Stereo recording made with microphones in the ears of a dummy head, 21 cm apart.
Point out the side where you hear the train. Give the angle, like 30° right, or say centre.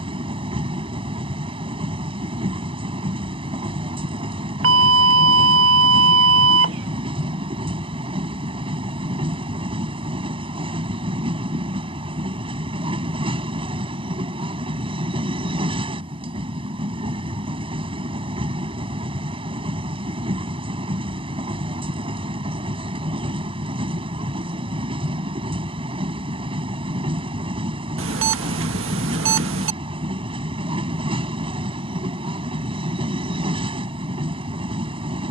20° right.